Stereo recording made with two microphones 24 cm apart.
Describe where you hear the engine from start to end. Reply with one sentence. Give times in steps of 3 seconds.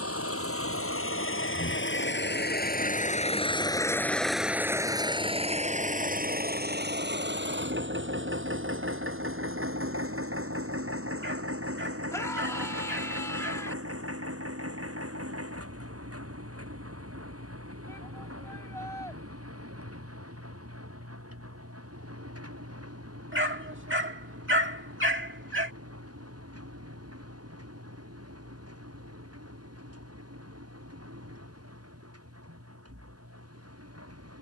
You can hear the engine on the left from 0 s, in the centre from 3 s and on the right from 6 s.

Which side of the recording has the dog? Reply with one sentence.
You can hear the dog on the right.